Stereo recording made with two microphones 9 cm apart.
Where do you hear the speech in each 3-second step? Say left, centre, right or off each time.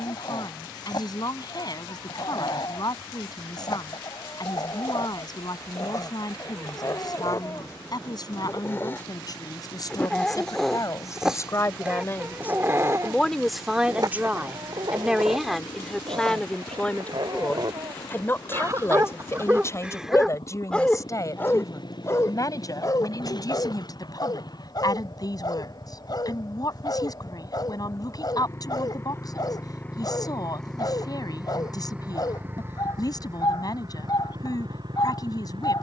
left, left, left, left, centre, centre, left, left, left, left, left, left.